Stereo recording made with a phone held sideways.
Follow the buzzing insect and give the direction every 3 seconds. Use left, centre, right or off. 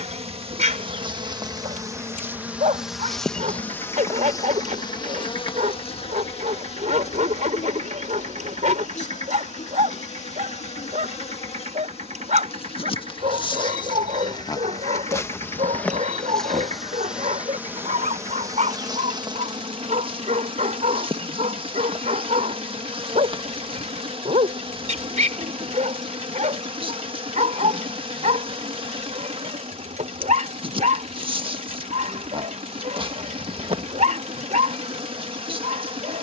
right, left, left, left, left, centre, right, right, right, right, right, right.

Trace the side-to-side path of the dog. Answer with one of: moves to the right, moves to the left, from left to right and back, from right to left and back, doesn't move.
doesn't move.